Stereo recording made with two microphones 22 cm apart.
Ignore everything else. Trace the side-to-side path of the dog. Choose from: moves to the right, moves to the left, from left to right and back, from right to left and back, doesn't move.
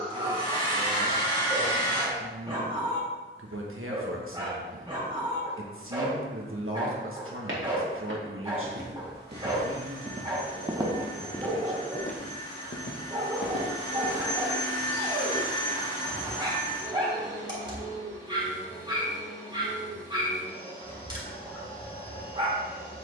doesn't move.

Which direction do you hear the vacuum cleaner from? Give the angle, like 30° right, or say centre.
20° left.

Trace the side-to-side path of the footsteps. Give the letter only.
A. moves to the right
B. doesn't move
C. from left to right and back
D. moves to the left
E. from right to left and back
D.